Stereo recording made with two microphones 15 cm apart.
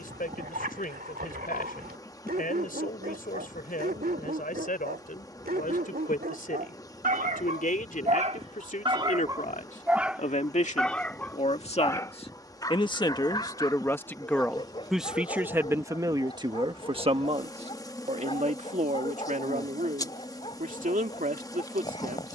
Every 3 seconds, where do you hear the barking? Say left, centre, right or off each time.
right, right, right, centre, left, left, left, left.